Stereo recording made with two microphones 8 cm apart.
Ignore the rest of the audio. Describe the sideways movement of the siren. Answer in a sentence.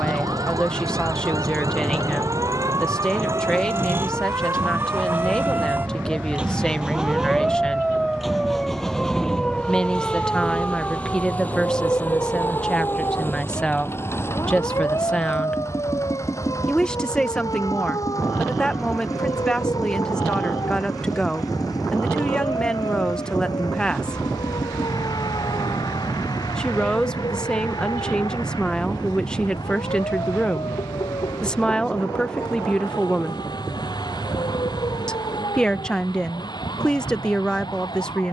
In this clip you hear the siren move from right to left.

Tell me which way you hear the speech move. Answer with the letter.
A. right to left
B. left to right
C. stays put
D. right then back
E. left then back
C.